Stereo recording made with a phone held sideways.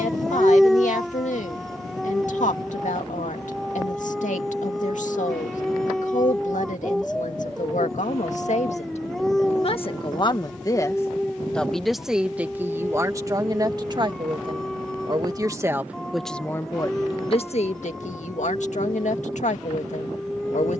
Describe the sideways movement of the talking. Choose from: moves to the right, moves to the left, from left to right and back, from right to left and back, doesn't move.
from left to right and back.